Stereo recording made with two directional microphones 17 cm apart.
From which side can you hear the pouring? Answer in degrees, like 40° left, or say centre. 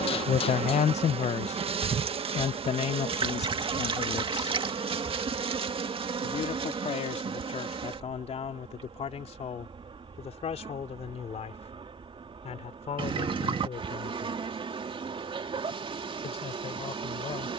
30° right.